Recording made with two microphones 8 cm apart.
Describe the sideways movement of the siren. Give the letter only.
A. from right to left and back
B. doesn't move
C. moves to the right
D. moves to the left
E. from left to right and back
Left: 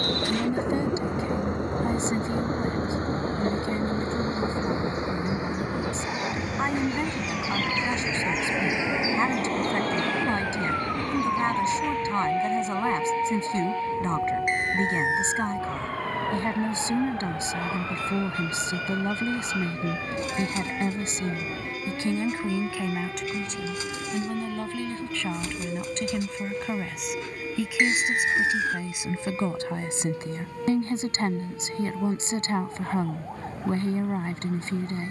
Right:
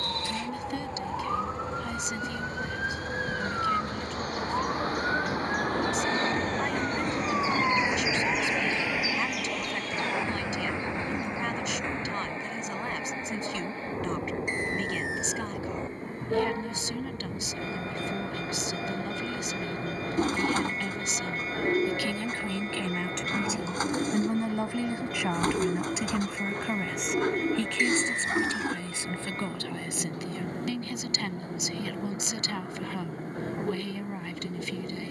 D.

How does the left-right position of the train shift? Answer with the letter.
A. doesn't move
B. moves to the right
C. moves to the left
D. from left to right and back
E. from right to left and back
B.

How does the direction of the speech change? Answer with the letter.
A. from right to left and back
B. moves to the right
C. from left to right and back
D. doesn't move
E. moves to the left
C.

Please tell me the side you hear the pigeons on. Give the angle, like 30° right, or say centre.
50° right.